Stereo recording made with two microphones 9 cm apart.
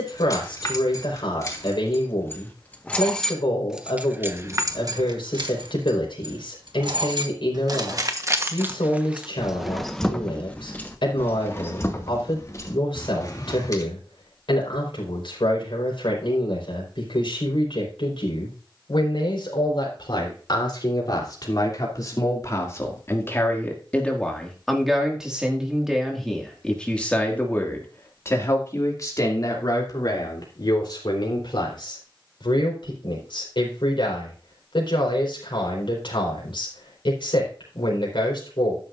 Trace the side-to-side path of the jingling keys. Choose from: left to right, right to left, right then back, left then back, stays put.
right then back.